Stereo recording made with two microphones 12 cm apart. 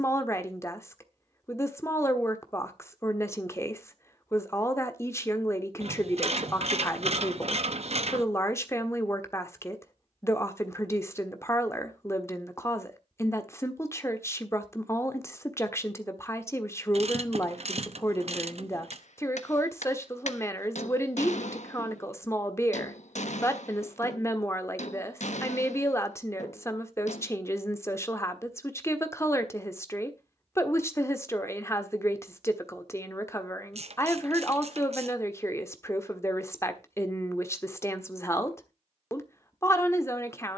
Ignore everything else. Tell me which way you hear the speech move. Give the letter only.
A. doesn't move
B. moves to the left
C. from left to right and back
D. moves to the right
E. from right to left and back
A.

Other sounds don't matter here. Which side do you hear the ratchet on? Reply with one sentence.
You can hear the ratchet on the right.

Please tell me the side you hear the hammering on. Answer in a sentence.
You can hear the hammering on the left.